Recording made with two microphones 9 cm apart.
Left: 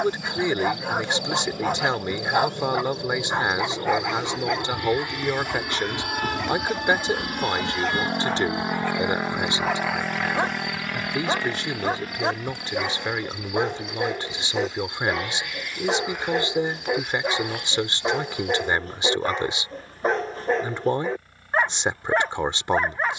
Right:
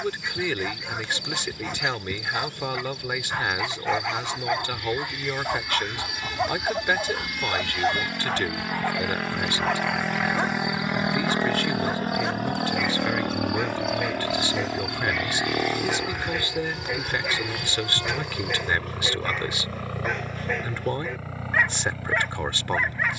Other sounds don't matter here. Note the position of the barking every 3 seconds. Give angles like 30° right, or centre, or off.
40° left, centre, 30° right, 10° left, 30° left, 30° left, 30° left, 30° left.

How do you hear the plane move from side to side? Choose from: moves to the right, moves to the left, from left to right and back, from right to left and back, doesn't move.
moves to the right.